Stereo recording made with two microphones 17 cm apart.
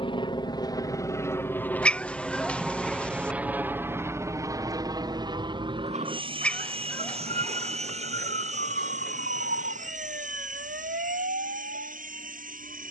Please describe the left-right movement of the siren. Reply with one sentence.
You can hear the siren move to the right.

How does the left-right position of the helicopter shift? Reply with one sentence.
You can hear the helicopter move from left to right.